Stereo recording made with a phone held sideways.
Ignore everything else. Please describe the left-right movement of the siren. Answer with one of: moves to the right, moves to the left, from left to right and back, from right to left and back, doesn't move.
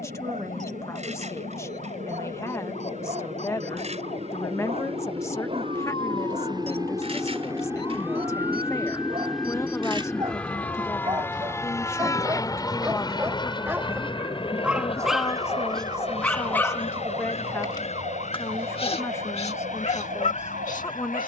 moves to the right.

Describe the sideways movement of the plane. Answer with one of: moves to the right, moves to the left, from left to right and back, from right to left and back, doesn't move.
moves to the left.